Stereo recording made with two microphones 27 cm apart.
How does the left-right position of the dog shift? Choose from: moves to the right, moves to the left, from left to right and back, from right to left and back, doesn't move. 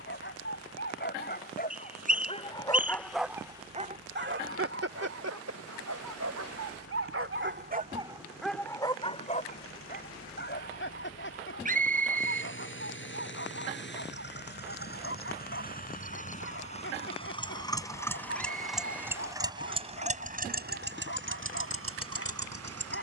from left to right and back.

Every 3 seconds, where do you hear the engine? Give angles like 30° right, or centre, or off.
60° left, 60° left, 60° left, 50° left, 40° left, 30° left, 20° right, 60° right.